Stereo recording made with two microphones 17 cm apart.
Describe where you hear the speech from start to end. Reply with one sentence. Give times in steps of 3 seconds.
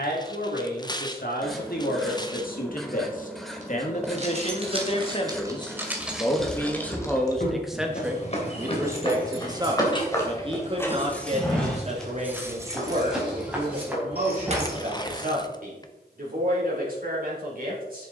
In this clip you hear the speech on the left from 0 s, in the centre from 6 s and on the right from 9 s.